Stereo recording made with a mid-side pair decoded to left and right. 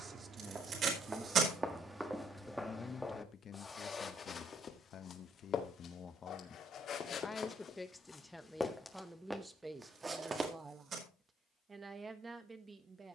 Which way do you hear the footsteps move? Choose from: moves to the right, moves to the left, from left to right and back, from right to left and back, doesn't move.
from right to left and back.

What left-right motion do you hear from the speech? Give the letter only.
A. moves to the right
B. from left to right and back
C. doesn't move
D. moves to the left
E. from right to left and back
E.